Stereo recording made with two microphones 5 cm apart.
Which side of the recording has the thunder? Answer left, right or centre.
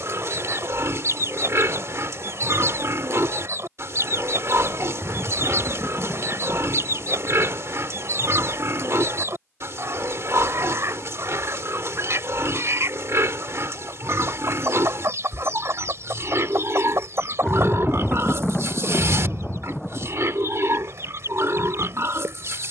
centre.